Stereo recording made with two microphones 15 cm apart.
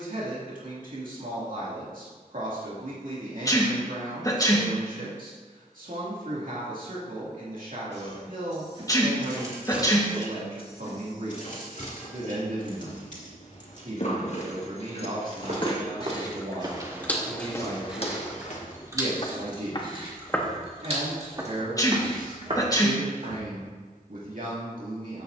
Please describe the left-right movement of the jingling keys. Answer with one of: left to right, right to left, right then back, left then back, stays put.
left then back.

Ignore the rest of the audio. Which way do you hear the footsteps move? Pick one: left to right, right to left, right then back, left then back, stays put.
left then back.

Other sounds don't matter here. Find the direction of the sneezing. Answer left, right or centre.
left.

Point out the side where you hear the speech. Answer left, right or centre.
right.